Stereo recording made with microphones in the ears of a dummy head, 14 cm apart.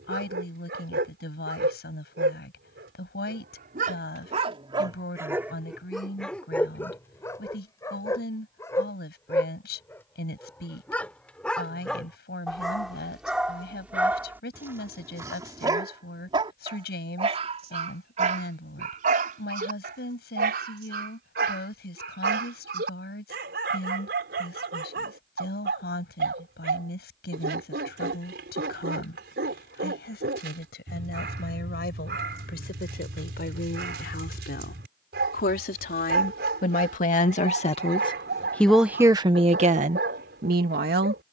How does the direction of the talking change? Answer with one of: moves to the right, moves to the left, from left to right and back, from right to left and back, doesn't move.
moves to the right.